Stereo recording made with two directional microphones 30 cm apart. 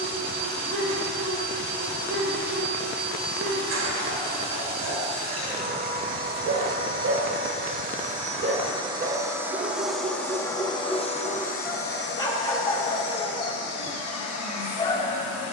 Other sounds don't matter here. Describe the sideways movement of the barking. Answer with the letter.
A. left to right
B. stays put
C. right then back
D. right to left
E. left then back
D.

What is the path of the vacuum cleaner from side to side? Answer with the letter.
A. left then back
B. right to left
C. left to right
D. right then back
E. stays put
B.